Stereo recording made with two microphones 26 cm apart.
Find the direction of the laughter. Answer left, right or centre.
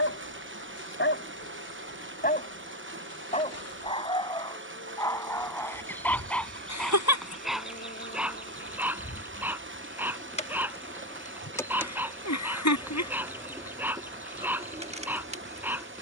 left.